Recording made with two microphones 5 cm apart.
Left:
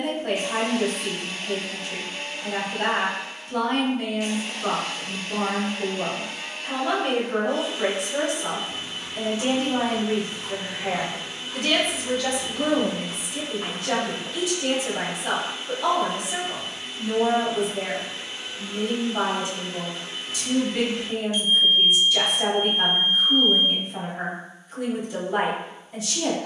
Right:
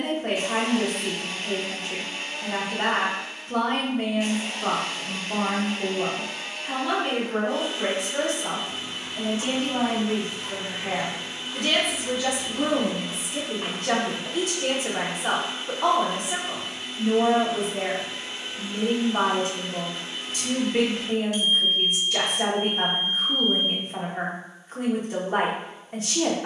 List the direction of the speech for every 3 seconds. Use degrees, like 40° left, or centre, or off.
50° right, 30° right, 10° left, 20° left, 30° right, 50° right, 50° right, 50° right, 50° right.